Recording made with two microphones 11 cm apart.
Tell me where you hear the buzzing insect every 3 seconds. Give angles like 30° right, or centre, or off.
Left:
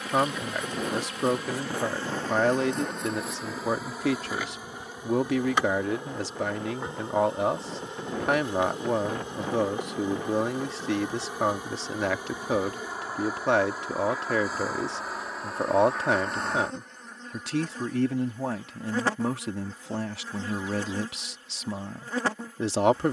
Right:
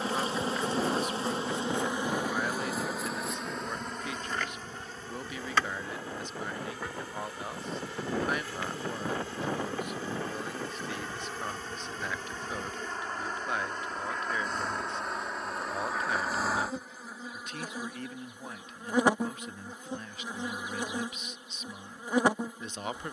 20° right, 10° left, 20° left, 20° left, 10° left, centre, 20° right, 20° right.